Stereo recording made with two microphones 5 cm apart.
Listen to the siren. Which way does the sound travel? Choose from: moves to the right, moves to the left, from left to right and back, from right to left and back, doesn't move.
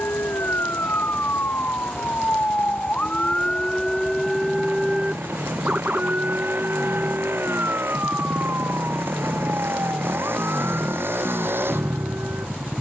moves to the right.